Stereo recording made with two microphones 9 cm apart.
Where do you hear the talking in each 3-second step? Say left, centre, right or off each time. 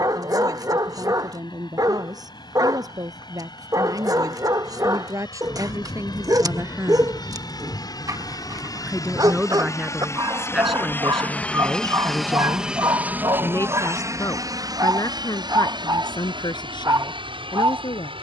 right, right, right, centre, left, left.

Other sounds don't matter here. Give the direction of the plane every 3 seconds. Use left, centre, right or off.
left, left, left, left, right, right.